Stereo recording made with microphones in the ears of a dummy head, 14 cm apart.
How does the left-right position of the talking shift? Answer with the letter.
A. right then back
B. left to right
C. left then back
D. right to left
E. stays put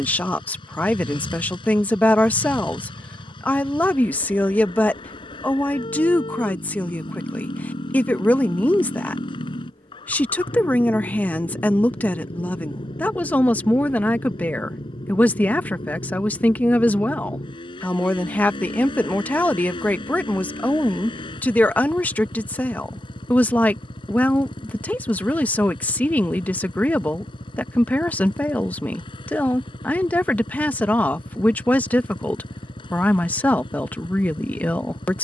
E.